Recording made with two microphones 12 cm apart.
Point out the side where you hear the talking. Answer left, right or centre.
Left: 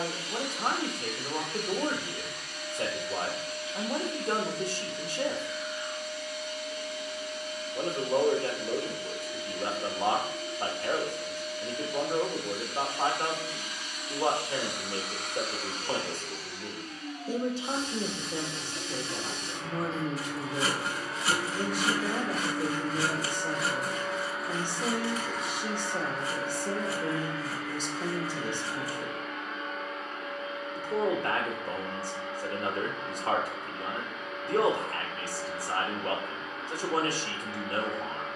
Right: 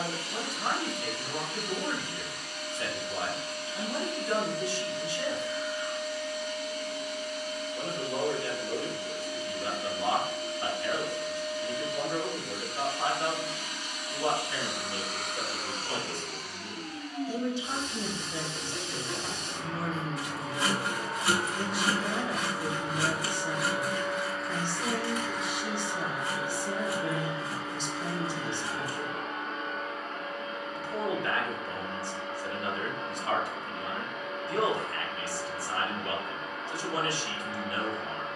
left.